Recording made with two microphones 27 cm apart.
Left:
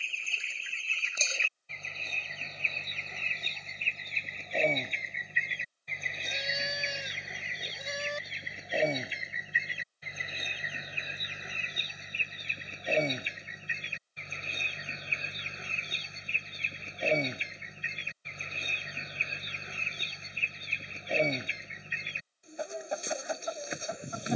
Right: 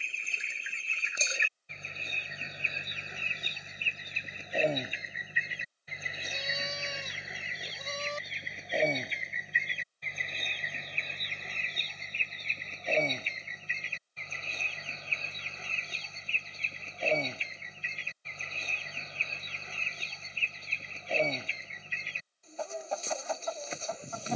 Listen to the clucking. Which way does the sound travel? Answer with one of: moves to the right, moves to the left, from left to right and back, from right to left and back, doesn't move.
moves to the left.